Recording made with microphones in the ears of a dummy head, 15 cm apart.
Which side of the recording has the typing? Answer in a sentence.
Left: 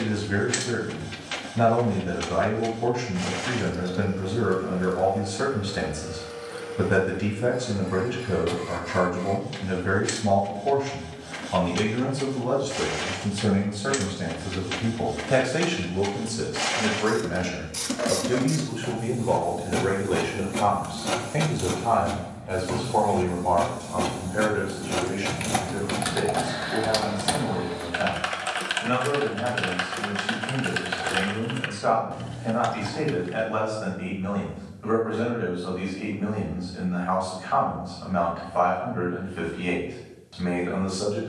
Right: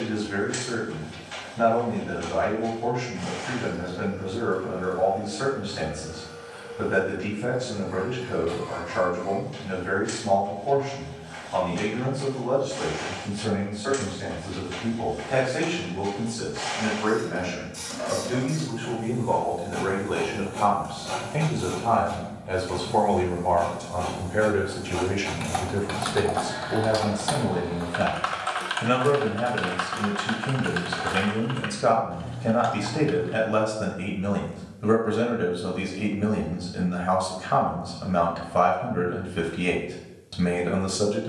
You can hear the typing on the left.